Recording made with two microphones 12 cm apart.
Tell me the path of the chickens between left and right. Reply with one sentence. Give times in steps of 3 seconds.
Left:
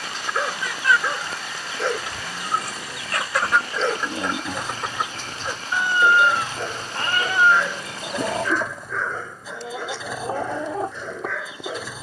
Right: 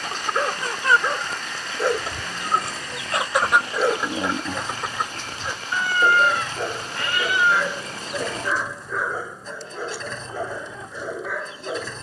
You can hear the chickens on the right from 0 s, in the centre from 3 s and on the left from 6 s.